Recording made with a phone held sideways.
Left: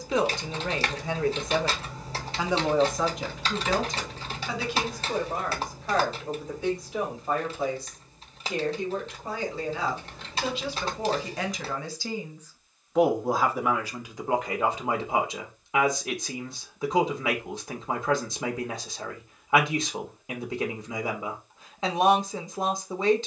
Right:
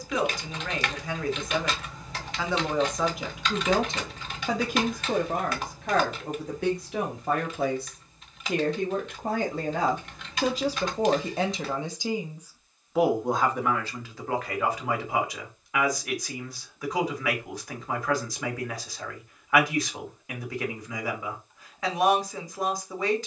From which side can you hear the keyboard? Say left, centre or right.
left.